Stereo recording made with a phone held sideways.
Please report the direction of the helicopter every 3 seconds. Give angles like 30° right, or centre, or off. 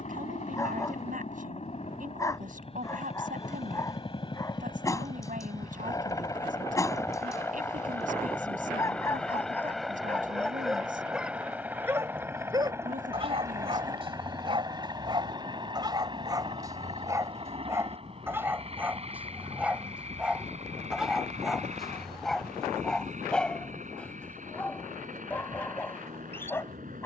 40° left, 30° left, 10° left, centre, 20° right, 30° right, 40° right, 50° right, 50° right.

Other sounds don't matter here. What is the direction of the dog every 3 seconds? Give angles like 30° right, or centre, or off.
20° left, 20° left, 20° left, 10° left, 30° right, 20° right, 10° right, centre, 10° left.